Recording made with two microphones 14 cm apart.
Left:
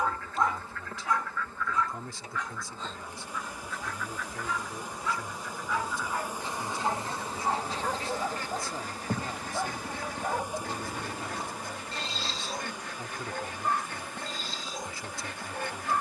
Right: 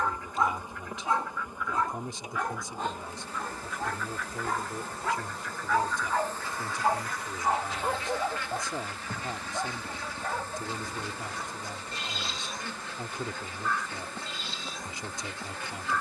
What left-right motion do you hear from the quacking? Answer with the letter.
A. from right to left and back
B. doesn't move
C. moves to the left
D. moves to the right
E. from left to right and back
C.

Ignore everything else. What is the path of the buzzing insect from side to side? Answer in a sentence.
In this clip you hear the buzzing insect go left and come back.